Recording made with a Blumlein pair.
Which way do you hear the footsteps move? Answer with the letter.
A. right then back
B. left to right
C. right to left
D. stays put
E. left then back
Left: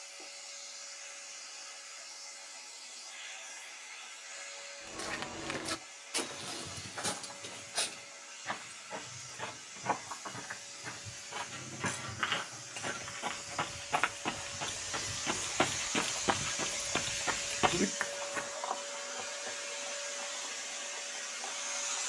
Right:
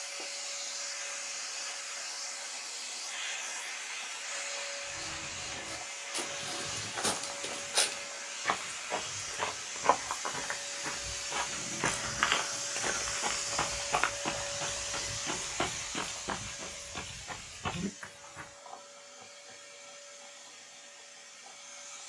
A.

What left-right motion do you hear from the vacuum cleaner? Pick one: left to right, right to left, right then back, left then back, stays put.
right to left.